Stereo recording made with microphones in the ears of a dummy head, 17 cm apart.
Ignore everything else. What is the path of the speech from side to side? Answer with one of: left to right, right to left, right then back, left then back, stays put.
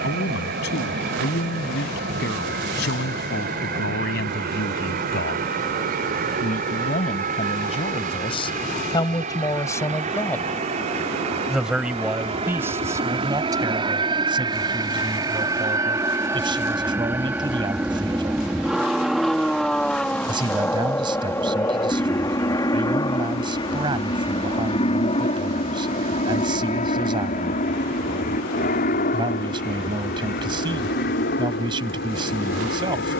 left to right.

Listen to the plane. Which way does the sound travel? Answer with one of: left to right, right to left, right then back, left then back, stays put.
right to left.